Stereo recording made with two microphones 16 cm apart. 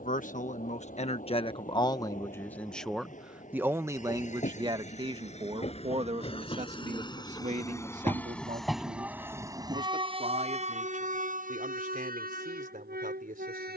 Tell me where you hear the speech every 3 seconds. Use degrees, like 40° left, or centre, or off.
30° left, 30° right, 50° right, 60° right, 60° right.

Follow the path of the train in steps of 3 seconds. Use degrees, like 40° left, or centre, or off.
60° left, 50° left, 20° left, 40° right, 70° right.